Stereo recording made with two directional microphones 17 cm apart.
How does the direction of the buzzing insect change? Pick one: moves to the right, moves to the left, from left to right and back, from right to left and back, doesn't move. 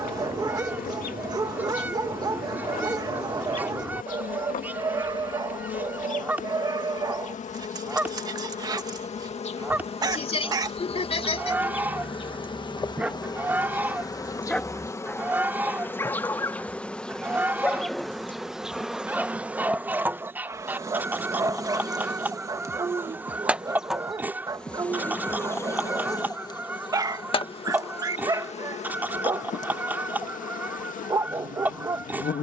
from left to right and back.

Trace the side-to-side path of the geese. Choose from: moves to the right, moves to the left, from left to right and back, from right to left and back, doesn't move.
doesn't move.